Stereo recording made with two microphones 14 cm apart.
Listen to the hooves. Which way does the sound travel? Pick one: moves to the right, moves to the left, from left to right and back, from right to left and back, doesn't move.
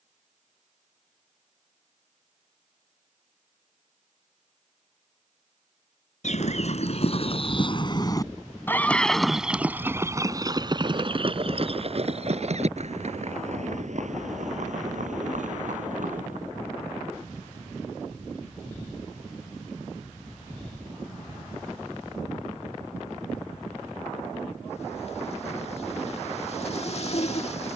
moves to the right.